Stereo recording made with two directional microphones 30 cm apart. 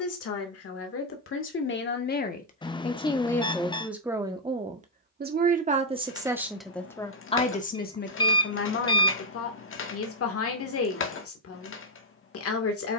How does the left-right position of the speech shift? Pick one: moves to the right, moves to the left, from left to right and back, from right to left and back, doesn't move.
from left to right and back.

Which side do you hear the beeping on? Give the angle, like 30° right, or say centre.
20° left.